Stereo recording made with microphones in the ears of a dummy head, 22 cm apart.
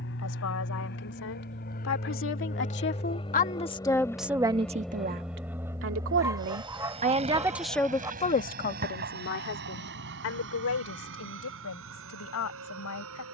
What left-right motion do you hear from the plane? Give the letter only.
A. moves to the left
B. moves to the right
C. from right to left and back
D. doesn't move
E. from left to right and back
B.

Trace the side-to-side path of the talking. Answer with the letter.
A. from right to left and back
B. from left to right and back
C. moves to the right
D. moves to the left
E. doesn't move
B.